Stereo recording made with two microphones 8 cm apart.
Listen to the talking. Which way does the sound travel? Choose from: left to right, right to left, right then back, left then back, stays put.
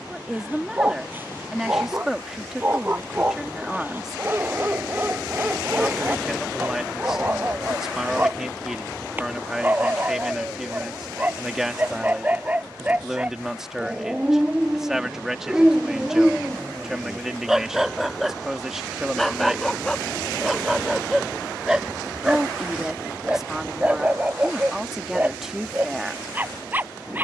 stays put.